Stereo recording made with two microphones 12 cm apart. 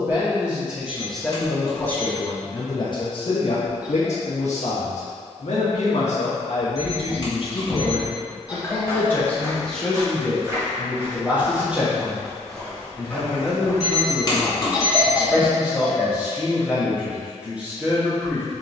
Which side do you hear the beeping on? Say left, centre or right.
left.